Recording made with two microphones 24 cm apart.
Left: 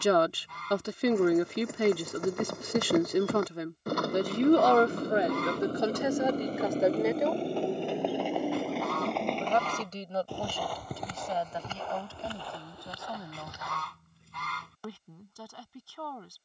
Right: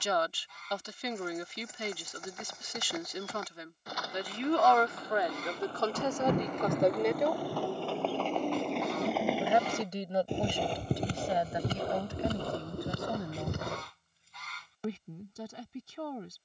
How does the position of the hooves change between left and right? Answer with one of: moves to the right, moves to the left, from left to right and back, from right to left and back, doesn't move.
moves to the right.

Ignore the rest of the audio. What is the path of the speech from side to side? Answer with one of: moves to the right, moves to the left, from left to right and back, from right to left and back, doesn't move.
moves to the right.